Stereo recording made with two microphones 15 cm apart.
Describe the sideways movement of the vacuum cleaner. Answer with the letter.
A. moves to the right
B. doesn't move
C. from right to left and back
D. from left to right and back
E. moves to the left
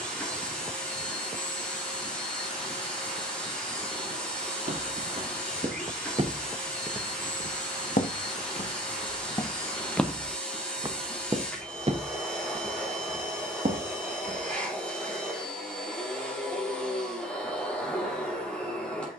B.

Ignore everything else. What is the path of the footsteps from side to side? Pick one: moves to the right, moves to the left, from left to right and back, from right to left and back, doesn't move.
from right to left and back.